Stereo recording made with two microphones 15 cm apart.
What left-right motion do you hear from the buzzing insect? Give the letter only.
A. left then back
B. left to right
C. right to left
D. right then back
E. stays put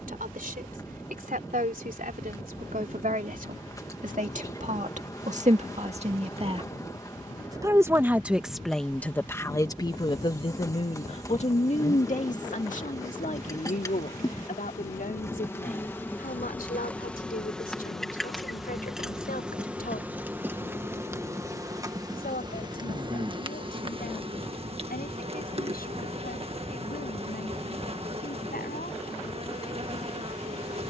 B.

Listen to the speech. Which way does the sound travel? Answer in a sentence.
You can hear the speech move from right to left.